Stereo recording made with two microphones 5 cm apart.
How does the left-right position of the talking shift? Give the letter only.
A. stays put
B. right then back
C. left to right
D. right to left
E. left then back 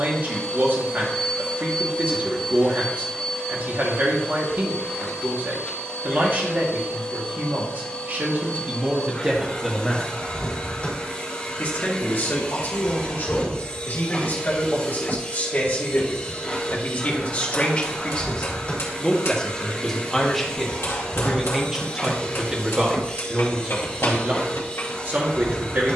E.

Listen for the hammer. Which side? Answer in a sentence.
In this clip you hear the hammer on the left.